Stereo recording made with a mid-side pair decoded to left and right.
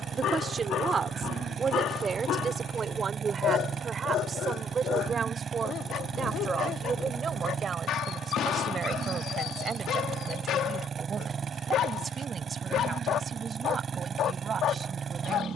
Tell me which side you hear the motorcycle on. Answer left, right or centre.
right.